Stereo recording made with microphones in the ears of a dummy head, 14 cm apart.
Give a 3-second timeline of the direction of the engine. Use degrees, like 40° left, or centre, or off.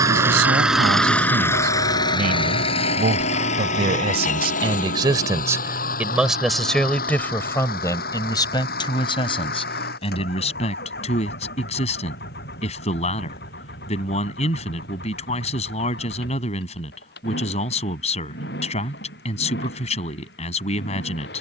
10° left, 50° left, 70° left, 70° left, 70° left, 80° left, 80° left.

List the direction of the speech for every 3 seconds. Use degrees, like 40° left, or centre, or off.
70° right, 30° right, 20° left, 40° left, 40° left, 40° left, 40° left.